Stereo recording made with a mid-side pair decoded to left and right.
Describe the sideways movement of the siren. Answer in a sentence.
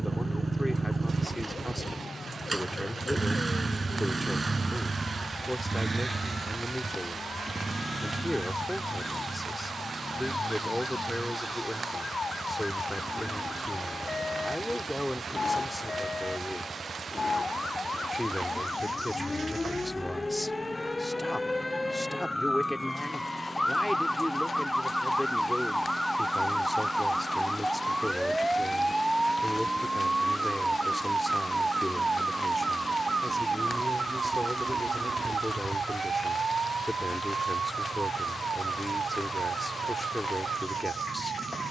You can hear the siren go from the left side to the right.